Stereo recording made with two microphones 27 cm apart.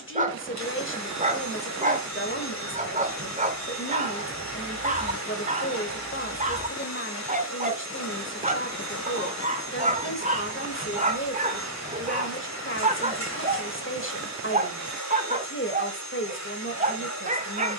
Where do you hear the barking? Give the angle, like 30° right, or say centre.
30° right.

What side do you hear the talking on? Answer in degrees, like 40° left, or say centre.
50° left.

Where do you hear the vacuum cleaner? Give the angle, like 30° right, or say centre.
80° left.